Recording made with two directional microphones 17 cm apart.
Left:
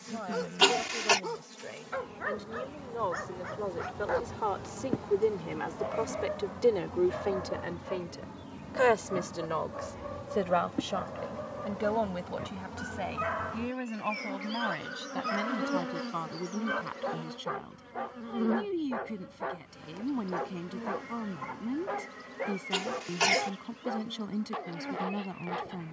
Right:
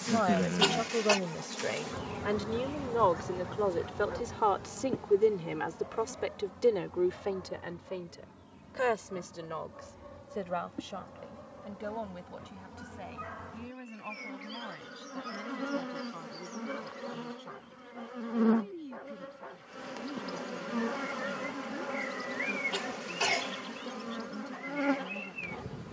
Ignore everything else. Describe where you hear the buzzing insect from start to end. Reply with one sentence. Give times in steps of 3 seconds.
You can hear the buzzing insect on the right from 0 s, in the centre from 3 s, on the left from 6 s, in the centre from 15 s and on the right from 18 s.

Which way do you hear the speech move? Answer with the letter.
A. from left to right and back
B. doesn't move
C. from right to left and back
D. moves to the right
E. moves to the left
E.